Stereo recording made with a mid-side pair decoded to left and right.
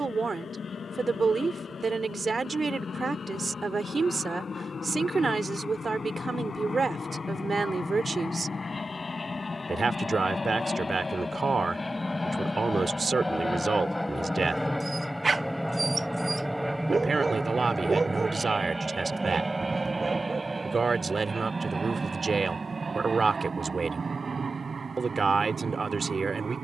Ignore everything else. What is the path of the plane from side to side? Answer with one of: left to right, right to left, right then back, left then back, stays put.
left to right.